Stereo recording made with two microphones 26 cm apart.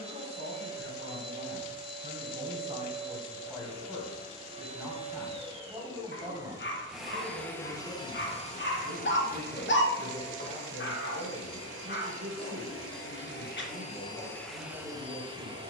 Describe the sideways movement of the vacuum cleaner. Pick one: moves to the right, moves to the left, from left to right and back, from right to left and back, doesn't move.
from right to left and back.